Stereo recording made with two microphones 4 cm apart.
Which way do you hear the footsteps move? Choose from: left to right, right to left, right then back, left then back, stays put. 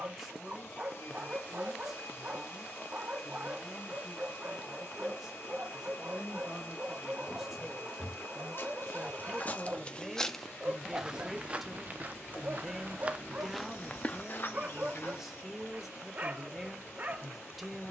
right then back.